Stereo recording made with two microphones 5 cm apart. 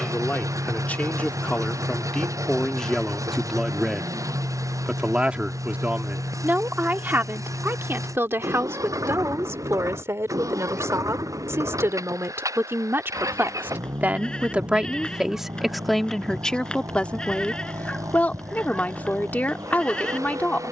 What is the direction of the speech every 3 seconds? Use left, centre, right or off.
left, centre, right, right, right, centre, left.